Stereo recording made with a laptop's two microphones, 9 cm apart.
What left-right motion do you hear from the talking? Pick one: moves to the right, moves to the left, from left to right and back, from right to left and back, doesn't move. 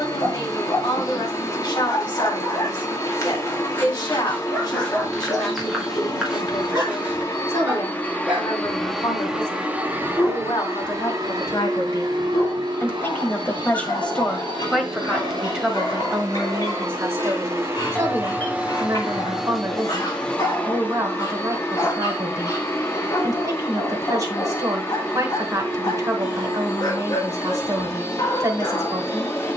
moves to the right.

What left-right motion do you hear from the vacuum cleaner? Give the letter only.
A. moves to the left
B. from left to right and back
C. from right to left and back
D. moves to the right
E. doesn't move
B.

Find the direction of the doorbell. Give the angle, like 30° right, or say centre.
20° left.